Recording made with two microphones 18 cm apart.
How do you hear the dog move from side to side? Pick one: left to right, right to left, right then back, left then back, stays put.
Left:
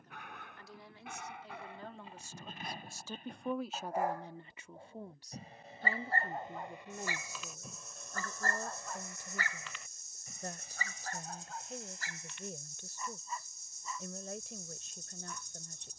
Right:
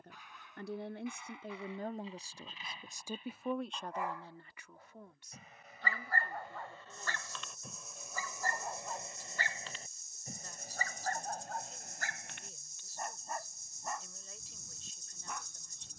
left to right.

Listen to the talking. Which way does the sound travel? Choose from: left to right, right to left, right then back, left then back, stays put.
right to left.